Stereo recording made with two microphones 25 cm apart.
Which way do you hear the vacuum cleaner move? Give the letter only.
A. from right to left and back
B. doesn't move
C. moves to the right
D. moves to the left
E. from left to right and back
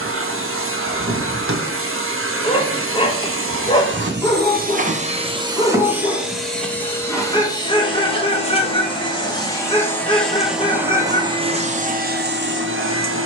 A.